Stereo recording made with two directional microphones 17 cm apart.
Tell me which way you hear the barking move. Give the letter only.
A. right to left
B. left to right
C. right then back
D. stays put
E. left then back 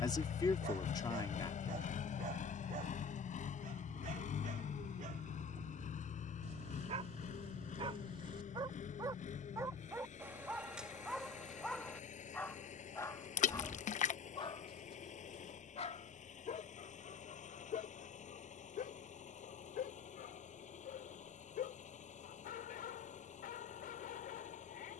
A.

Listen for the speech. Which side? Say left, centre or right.
left.